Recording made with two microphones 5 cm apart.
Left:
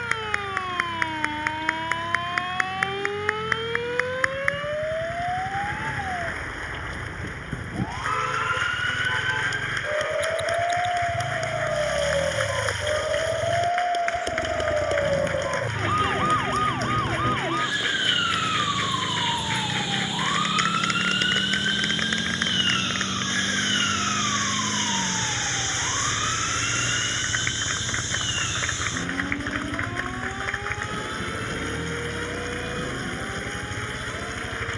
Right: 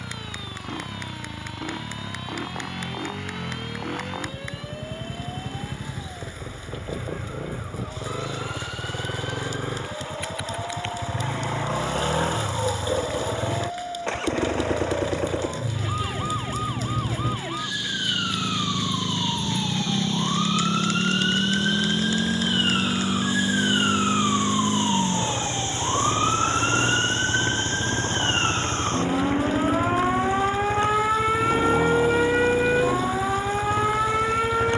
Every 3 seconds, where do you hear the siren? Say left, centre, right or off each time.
left, left, left, left, left, left, centre, centre, right, right, right, right.